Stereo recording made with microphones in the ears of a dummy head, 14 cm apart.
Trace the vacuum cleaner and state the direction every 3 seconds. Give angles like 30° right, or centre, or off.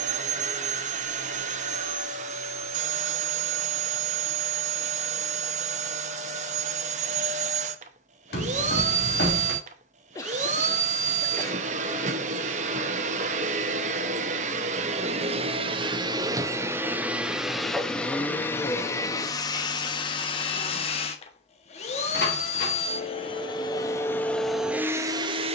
50° right, 50° right, 50° right, 50° right, 50° right, 20° right, 20° left, 40° left, 10° right.